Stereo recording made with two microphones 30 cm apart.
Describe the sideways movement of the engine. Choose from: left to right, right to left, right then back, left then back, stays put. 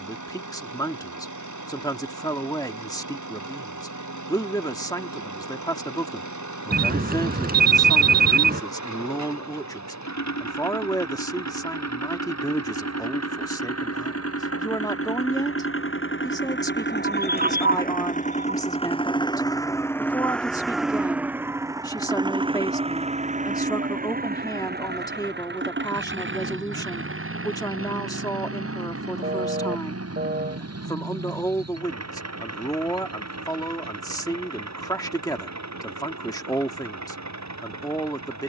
left to right.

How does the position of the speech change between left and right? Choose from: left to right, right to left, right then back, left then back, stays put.
stays put.